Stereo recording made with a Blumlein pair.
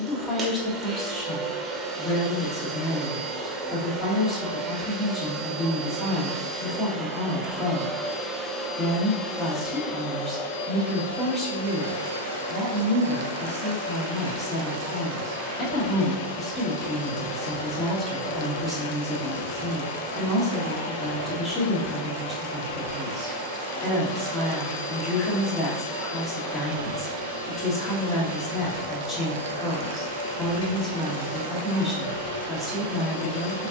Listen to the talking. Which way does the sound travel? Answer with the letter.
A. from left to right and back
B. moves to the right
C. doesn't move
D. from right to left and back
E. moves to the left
C.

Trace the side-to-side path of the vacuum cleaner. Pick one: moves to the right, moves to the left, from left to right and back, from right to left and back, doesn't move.
moves to the left.